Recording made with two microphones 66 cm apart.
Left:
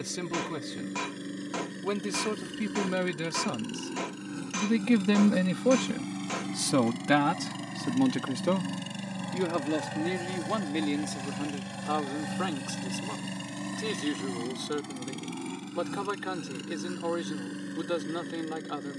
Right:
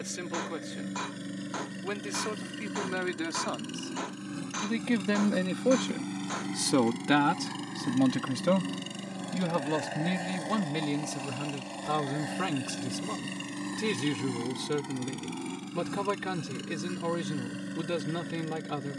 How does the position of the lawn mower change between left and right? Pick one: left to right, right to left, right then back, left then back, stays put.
left then back.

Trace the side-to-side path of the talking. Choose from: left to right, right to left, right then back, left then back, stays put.
left to right.